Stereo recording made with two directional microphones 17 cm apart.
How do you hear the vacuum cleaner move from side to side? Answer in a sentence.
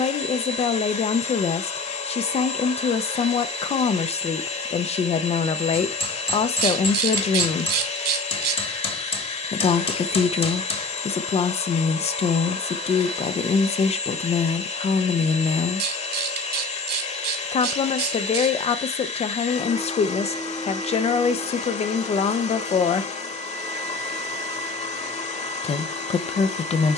In this clip you hear the vacuum cleaner stay in one place.